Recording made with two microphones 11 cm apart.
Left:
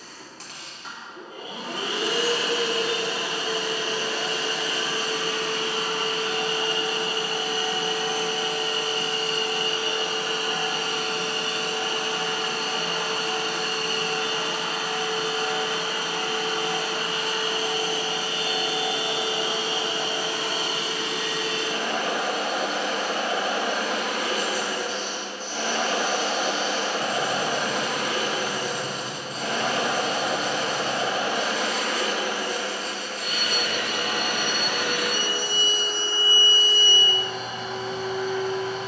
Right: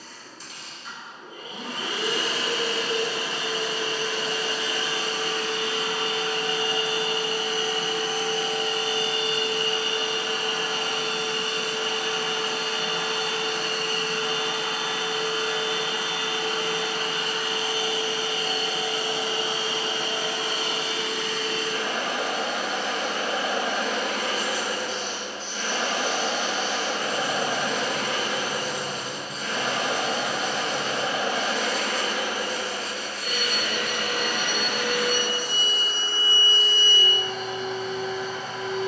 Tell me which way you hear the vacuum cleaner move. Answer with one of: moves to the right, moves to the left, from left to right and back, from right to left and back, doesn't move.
doesn't move.